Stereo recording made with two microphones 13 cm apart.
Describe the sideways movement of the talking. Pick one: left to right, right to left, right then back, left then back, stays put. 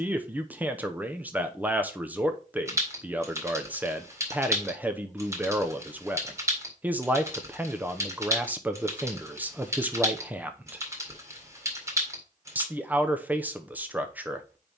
stays put.